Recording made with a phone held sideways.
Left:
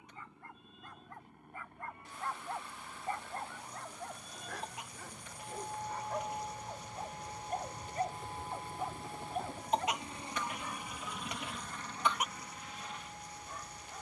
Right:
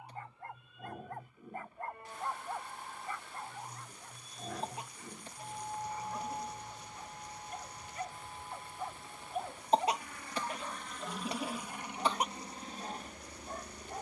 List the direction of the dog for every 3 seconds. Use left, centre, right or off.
right, left, left, right, right.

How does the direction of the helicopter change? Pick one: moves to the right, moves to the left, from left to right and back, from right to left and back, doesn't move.
moves to the right.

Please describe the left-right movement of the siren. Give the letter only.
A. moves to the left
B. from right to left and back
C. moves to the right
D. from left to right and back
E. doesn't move
A.